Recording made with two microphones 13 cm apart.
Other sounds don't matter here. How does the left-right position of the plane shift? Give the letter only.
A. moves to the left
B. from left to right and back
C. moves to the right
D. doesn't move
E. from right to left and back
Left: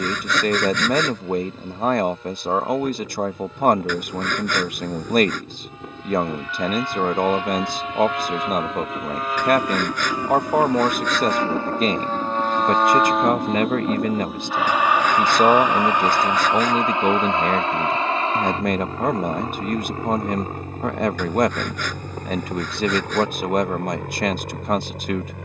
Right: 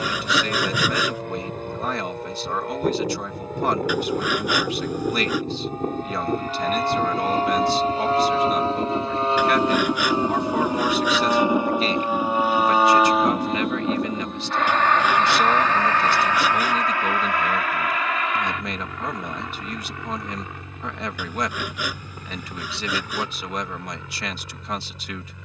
A.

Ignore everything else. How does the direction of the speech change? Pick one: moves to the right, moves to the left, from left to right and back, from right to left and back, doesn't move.
doesn't move.